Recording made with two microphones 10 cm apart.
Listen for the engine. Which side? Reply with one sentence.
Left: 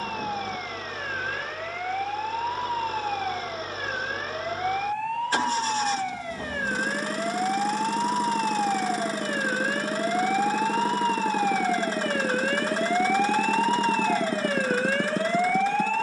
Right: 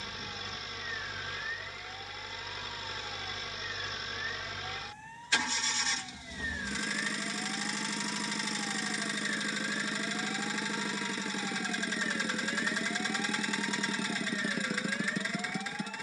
In this clip you hear the engine on the left.